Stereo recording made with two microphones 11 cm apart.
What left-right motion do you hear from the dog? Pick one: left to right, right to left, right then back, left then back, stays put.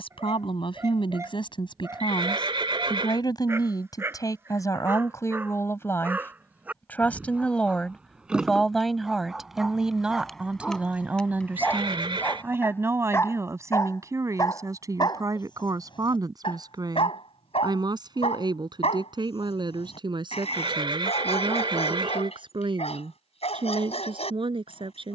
right to left.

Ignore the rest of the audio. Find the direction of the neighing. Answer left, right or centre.
right.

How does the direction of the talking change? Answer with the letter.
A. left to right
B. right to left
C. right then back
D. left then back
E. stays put
A.